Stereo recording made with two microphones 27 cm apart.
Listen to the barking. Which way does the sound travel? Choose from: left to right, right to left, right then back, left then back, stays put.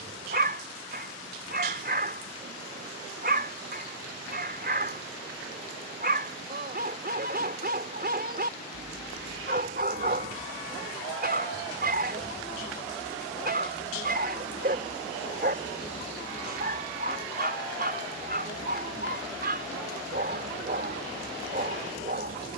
stays put.